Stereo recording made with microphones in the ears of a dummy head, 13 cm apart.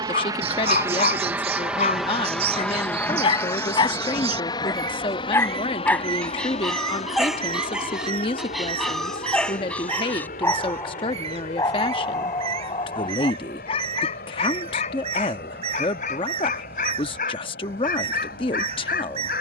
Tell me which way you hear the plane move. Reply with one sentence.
You can hear the plane go from the right side to the left.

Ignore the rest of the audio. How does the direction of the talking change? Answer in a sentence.
In this clip you hear the talking stay in one place.